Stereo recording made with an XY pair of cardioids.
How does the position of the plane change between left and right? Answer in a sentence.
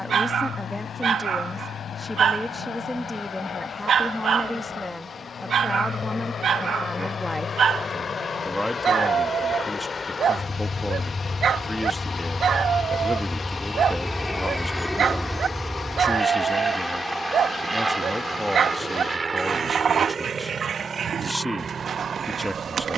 In this clip you hear the plane travel towards the right.